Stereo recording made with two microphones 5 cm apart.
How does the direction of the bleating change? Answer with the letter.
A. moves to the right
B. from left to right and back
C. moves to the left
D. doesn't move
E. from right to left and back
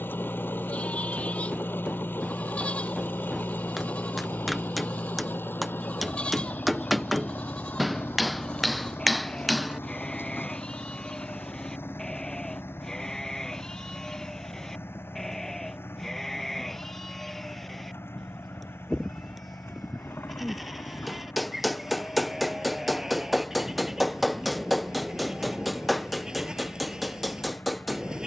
A.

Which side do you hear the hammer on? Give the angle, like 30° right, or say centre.
centre.